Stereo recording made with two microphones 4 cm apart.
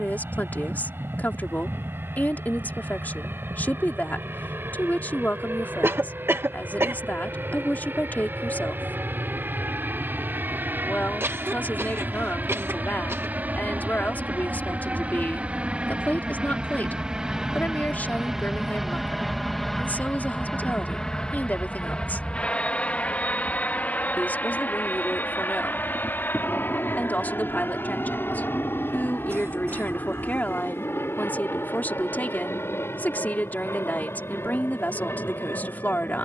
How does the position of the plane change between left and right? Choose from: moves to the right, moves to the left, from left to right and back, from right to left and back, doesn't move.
moves to the left.